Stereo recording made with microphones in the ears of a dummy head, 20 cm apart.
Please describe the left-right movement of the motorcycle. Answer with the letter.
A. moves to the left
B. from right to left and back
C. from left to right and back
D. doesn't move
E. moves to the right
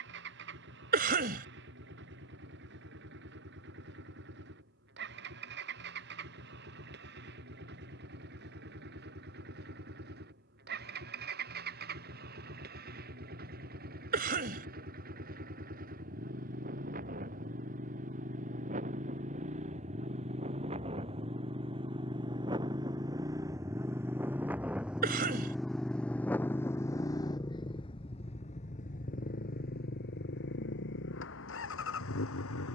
A.